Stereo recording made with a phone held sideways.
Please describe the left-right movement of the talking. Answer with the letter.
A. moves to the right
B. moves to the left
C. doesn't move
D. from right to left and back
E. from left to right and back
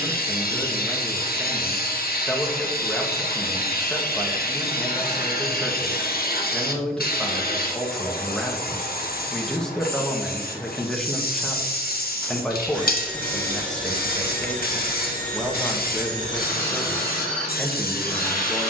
C.